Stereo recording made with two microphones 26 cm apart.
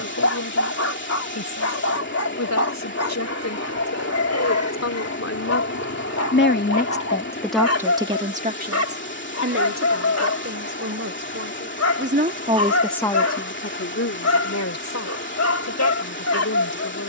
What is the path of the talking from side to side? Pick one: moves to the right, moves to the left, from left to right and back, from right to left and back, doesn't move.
from left to right and back.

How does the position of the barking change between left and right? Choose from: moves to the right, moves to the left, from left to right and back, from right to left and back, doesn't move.
doesn't move.